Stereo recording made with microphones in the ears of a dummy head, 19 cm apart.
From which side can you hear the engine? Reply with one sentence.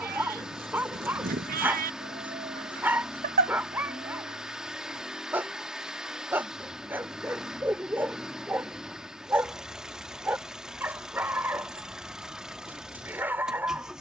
In this clip you hear the engine in the centre.